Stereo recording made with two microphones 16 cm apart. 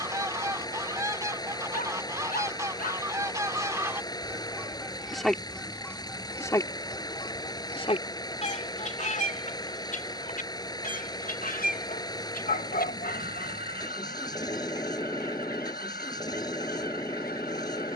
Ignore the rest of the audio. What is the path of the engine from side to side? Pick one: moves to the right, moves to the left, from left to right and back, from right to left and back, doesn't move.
doesn't move.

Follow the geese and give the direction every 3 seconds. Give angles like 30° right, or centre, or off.
20° right, 10° right, 30° left, 60° left, 70° left, 80° left.